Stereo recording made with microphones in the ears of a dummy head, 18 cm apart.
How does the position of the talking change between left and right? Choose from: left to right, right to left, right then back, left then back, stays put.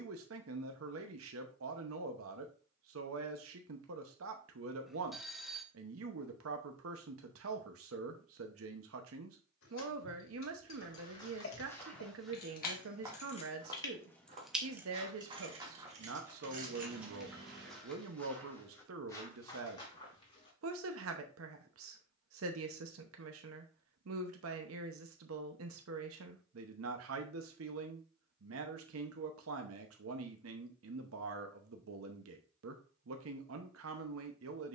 stays put.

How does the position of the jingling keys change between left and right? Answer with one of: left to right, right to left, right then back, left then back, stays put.
left to right.